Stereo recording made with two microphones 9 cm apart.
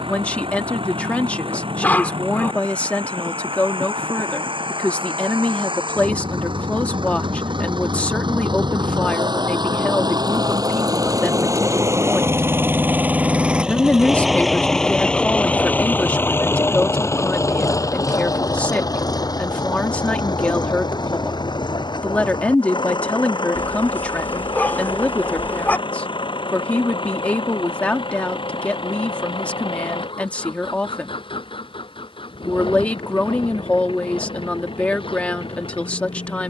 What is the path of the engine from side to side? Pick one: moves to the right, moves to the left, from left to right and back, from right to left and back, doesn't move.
moves to the left.